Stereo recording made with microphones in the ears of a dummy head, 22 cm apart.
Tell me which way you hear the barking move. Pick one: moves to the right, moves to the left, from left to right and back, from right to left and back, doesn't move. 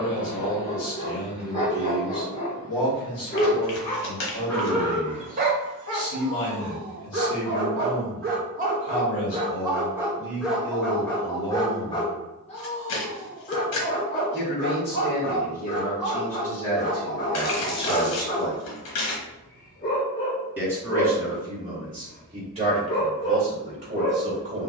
from left to right and back.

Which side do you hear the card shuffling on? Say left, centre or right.
left.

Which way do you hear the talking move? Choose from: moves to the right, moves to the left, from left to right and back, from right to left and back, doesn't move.
moves to the right.